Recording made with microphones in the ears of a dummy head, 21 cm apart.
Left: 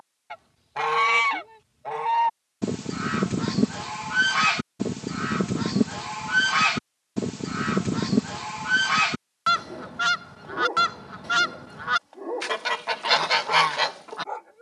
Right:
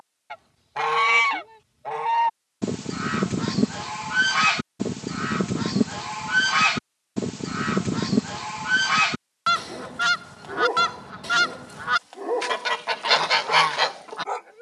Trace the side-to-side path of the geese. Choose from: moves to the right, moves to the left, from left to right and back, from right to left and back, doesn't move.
doesn't move.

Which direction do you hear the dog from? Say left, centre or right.
right.